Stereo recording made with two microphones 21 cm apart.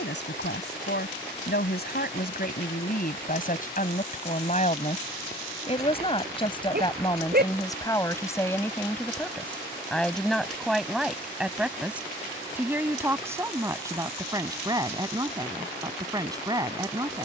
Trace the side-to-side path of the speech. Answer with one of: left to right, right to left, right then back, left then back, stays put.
left to right.